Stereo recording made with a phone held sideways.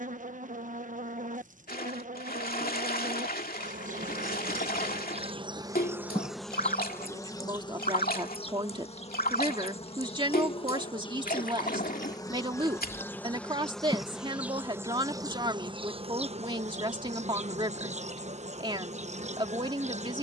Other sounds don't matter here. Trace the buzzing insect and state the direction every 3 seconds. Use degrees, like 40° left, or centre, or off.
50° right, 40° right, 20° left, 30° left, 10° left, 40° right, 40° right.